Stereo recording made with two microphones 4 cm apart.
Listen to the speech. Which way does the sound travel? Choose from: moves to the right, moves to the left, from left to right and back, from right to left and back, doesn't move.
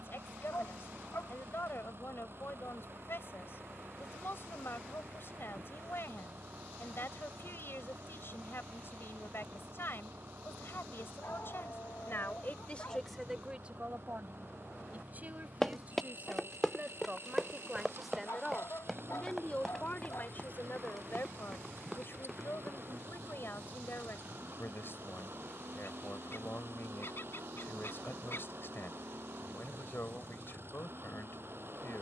from left to right and back.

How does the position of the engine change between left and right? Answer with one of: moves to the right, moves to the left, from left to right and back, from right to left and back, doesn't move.
doesn't move.